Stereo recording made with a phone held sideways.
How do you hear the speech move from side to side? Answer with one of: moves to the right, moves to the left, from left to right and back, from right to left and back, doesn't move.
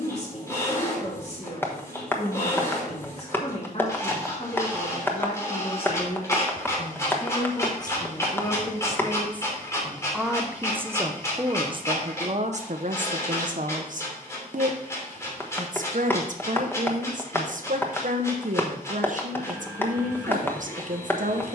moves to the right.